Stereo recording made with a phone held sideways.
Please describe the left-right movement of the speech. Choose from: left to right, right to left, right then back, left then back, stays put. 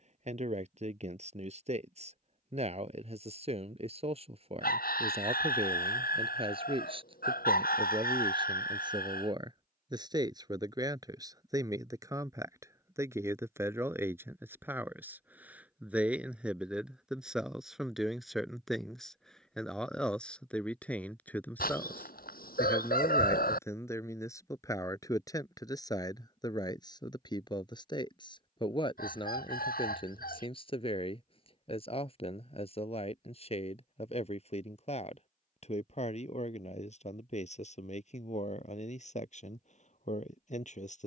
right to left.